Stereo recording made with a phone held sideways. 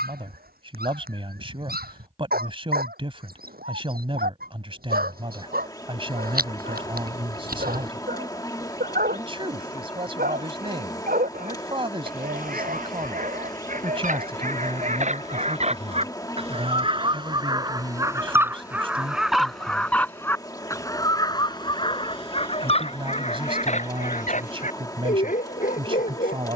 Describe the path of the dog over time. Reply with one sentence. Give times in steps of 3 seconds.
You can hear the dog on the right from 0 s, in the centre from 18 s and on the left from 21 s.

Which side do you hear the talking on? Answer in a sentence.
In this clip you hear the talking on the right.